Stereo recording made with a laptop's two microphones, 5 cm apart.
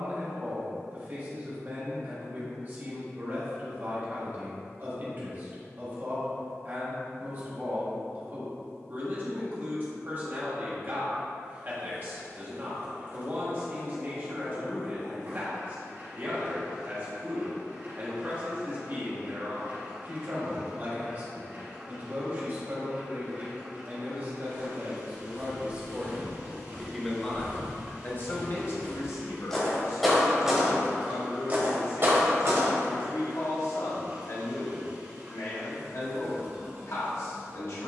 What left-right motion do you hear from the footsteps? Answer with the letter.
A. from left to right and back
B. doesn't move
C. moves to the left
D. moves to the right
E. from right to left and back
D.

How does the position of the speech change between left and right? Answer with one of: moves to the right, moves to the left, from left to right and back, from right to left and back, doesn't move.
moves to the left.